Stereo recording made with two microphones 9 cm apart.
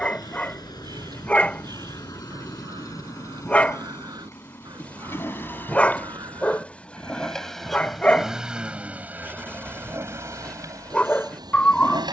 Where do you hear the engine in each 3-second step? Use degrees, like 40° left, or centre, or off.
40° left, 30° left, centre, 40° right.